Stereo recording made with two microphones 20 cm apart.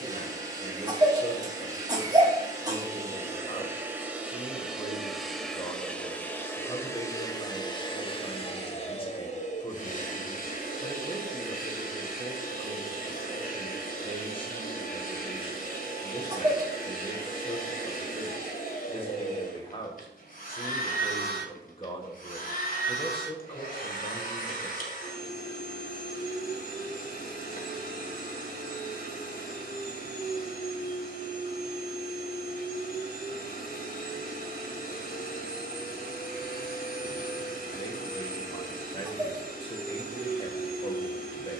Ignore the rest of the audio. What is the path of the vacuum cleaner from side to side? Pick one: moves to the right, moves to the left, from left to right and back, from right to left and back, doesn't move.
moves to the left.